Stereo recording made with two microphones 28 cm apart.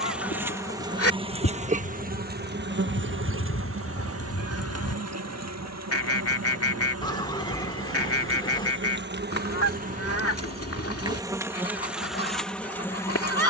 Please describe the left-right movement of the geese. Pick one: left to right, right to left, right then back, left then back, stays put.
stays put.